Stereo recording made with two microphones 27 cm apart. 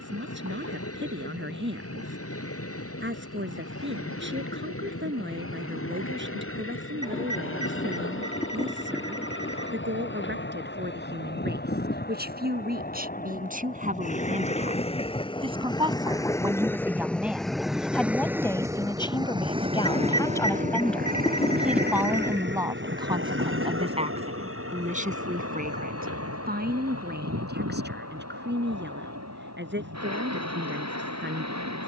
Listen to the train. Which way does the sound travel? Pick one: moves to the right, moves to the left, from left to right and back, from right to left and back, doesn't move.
moves to the right.